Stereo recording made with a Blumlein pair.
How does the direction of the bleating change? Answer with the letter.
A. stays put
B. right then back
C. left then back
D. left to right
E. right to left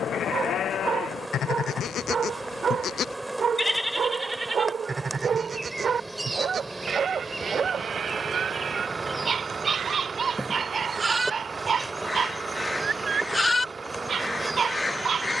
B.